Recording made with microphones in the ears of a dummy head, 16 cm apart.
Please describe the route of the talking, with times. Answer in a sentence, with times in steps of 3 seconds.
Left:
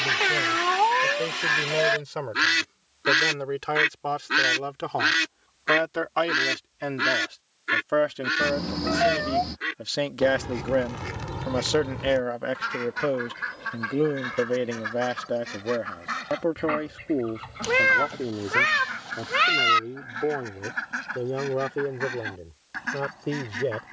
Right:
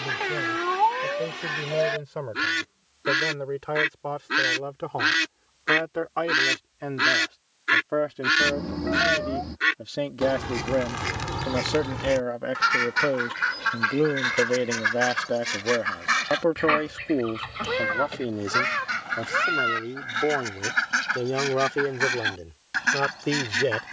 In this clip you hear the talking on the left from 0 s, in the centre from 12 s and on the right from 15 s.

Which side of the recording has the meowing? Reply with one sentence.
You can hear the meowing on the left.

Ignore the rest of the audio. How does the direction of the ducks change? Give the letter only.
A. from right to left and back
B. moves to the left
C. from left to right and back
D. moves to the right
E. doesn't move
D.